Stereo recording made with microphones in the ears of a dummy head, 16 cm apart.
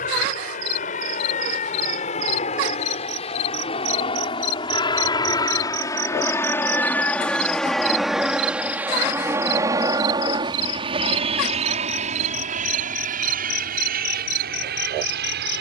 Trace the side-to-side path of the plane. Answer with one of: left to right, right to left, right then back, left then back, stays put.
left to right.